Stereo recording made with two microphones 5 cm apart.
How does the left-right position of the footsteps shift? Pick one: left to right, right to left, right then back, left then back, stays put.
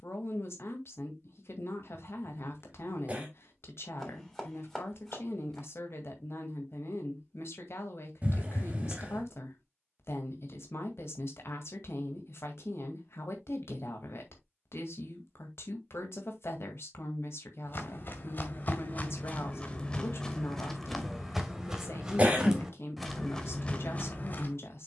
right then back.